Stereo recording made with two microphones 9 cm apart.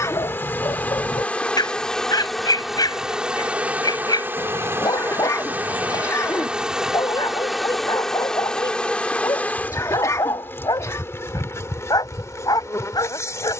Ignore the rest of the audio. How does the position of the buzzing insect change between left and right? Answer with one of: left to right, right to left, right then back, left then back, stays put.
right then back.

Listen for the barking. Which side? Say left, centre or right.
left.